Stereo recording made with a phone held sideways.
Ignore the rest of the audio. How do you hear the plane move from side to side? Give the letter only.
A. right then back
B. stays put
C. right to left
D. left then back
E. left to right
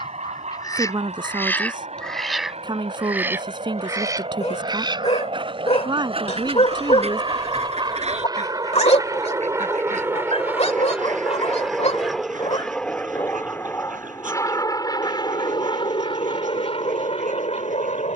C.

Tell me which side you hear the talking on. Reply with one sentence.
In this clip you hear the talking on the right.